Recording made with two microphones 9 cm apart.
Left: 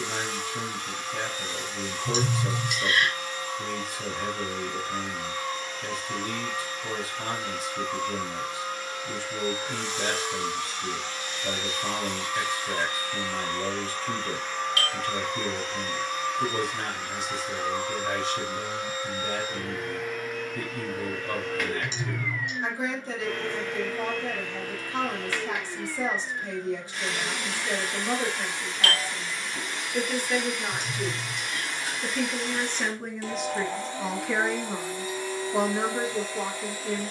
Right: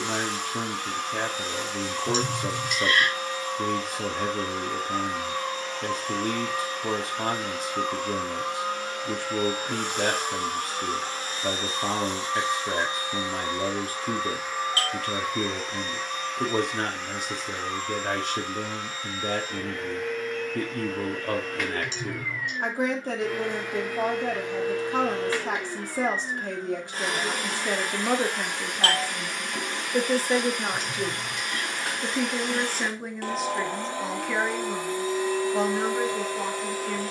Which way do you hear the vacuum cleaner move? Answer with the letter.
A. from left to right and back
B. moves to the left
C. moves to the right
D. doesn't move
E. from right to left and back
E.